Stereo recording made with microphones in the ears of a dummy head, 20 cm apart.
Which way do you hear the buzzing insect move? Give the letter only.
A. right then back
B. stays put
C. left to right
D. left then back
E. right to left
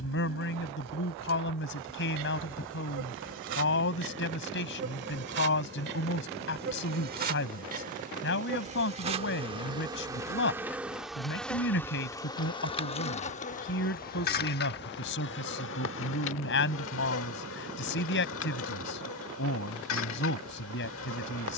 E.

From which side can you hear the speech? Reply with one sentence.
In this clip you hear the speech on the left.